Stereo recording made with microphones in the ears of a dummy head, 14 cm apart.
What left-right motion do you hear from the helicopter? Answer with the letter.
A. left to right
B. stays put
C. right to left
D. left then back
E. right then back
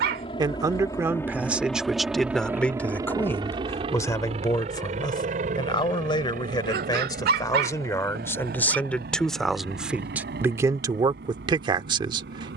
A.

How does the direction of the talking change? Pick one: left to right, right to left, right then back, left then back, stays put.
left then back.